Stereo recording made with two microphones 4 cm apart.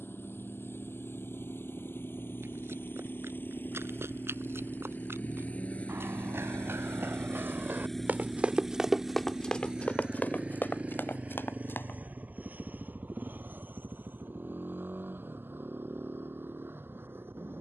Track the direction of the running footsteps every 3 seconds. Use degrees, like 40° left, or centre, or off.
80° right, 80° right, 50° right, 40° left, off, off.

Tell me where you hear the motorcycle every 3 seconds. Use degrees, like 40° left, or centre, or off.
70° left, 50° left, 10° left, 30° right, 50° right, 60° right.